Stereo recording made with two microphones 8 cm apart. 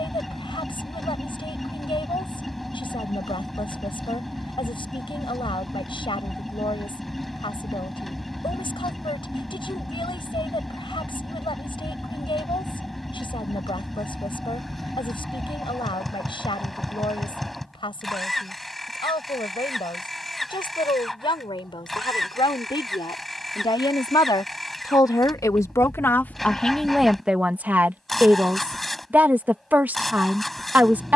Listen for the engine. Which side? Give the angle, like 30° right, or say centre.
centre.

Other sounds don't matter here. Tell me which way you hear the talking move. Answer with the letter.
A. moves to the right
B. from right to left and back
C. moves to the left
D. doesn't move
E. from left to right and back
A.